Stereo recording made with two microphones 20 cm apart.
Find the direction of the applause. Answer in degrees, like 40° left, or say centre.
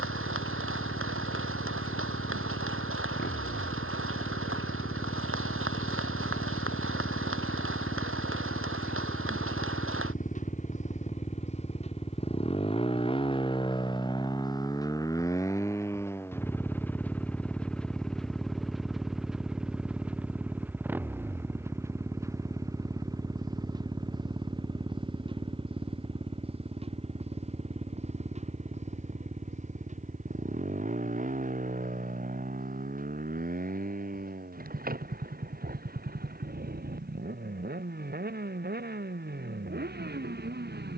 80° right.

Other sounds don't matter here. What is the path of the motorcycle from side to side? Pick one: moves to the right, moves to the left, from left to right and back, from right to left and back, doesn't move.
moves to the right.